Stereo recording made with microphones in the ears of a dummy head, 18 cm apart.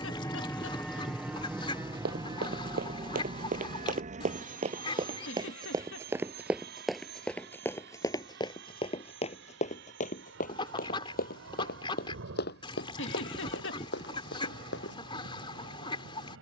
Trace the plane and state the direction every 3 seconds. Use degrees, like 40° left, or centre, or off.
10° right, 40° right, 50° right, 60° right, 60° right, 60° right.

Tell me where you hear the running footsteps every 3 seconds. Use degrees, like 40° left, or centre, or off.
50° right, 30° right, 10° left, 40° left, 60° left, off.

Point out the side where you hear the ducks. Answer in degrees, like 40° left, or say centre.
20° left.